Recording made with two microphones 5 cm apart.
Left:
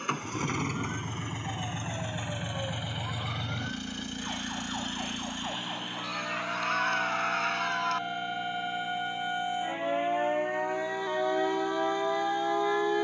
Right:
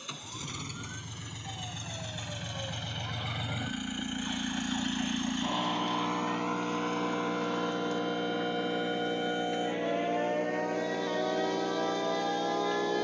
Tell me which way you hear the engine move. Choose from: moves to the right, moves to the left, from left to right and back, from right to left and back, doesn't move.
moves to the right.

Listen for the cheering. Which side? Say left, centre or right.
left.